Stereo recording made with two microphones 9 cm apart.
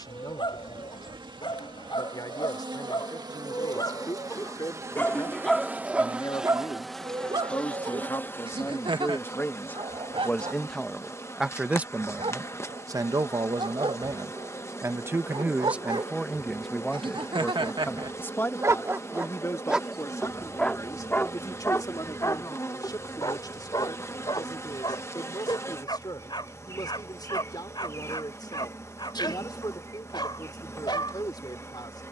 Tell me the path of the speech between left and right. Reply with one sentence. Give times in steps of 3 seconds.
You can hear the speech on the left from 0 s, in the centre from 9 s, on the right from 12 s, in the centre from 15 s and on the left from 18 s.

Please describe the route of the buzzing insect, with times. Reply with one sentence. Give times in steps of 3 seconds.
In this clip you hear the buzzing insect on the right from 0 s, in the centre from 6 s and on the left from 9 s.